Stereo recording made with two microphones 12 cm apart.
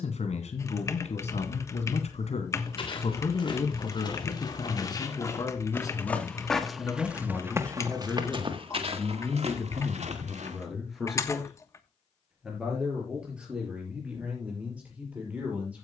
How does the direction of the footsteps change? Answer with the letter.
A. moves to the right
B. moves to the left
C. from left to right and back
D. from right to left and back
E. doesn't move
A.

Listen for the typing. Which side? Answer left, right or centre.
left.